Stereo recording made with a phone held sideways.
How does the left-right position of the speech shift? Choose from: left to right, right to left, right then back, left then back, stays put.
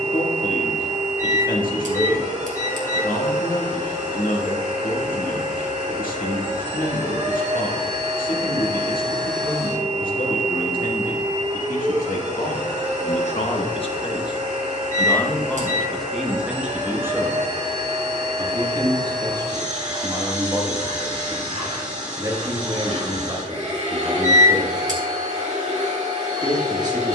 left to right.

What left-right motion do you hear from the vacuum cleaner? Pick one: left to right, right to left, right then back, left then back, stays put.
stays put.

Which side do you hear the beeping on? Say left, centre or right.
right.